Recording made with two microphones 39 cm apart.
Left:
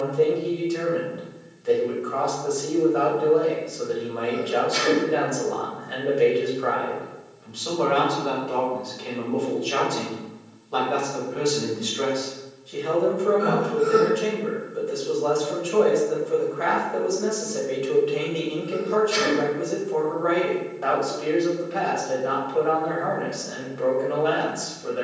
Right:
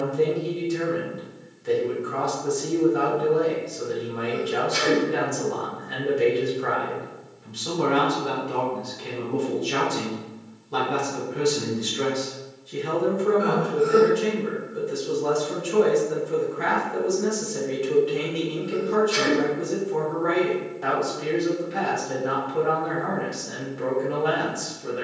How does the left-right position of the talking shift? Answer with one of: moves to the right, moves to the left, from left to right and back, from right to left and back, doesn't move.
doesn't move.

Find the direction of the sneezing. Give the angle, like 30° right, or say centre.
centre.